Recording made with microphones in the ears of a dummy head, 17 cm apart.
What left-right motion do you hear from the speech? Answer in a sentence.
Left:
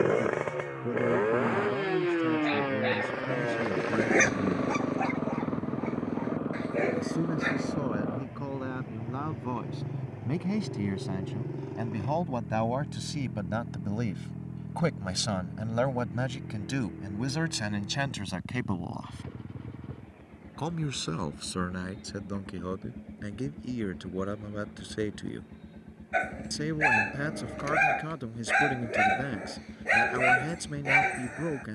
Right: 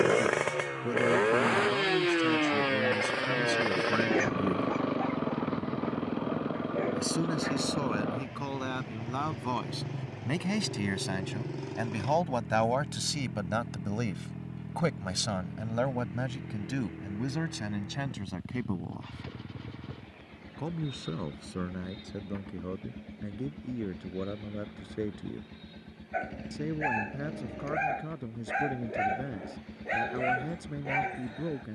You can hear the speech go from the right side to the left.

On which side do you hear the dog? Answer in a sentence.
In this clip you hear the dog on the left.